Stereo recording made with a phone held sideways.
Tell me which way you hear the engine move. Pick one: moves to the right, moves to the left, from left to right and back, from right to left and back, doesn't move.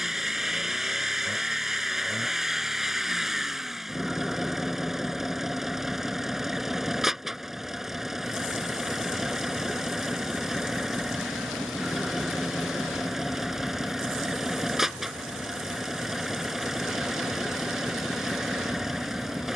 doesn't move.